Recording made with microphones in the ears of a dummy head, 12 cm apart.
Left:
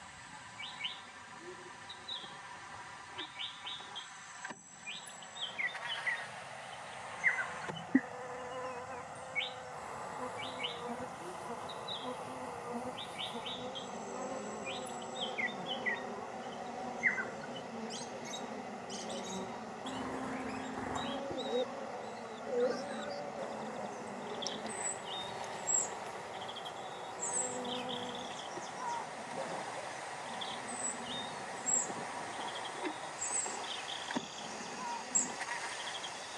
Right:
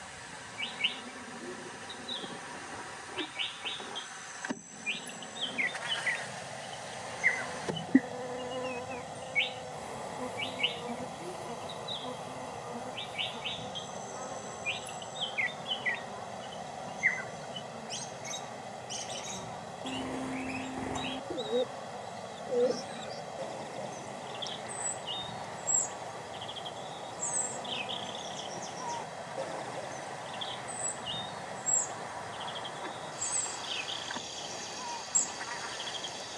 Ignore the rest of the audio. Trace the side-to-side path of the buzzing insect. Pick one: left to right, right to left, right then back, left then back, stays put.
right to left.